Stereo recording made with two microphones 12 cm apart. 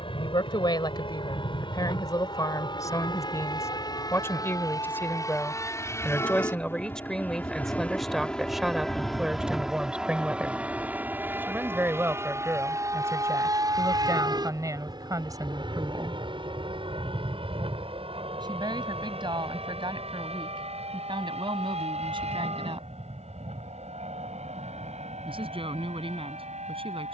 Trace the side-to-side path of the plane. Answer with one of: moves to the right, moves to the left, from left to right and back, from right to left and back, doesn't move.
moves to the right.